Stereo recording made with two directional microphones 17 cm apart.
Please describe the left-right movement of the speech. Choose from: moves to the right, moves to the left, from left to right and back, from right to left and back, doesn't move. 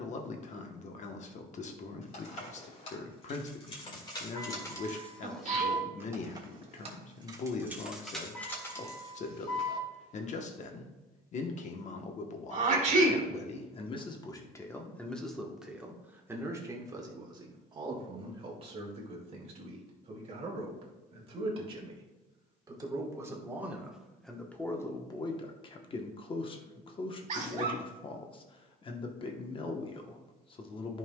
from left to right and back.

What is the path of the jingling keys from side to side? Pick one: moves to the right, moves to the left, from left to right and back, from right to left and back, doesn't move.
from left to right and back.